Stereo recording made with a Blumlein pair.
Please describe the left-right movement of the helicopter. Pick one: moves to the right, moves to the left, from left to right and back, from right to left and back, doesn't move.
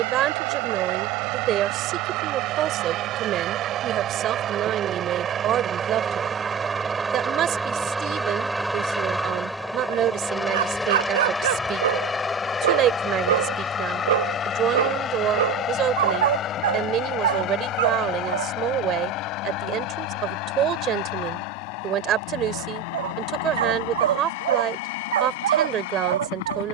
moves to the left.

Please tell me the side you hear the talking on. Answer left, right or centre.
right.